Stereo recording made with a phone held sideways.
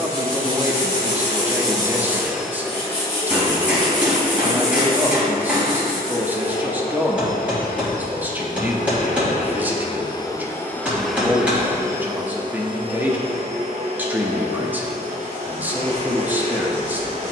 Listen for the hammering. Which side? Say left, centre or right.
centre.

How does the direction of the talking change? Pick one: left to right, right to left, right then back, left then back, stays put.
stays put.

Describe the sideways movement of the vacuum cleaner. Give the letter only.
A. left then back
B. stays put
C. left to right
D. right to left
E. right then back
A.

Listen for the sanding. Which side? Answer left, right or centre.
right.